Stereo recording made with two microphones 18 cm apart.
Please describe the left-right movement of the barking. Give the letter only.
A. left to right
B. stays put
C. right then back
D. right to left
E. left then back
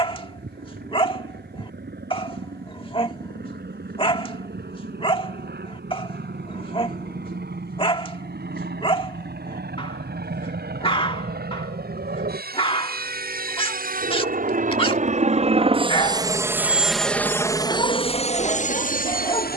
B.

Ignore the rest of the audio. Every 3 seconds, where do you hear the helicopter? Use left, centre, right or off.
right, right, right, right, right, centre, left.